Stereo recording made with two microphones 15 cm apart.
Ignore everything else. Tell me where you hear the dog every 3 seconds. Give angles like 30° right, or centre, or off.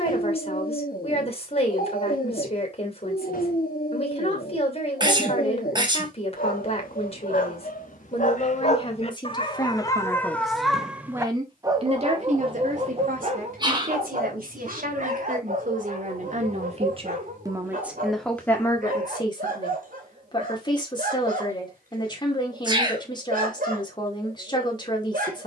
70° left, 70° left, 60° left, 10° left, 50° right, 60° right, 60° right, 60° right, 60° right.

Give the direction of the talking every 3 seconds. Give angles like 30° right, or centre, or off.
40° left, 40° left, 40° left, centre, 70° right, 50° right, 20° left, 30° left, 30° left.